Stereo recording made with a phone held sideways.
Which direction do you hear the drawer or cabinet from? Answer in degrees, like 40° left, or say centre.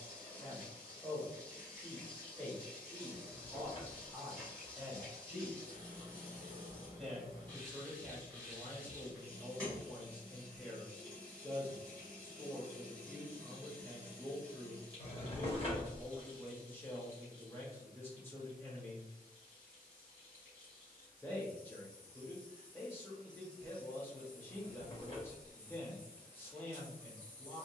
40° left.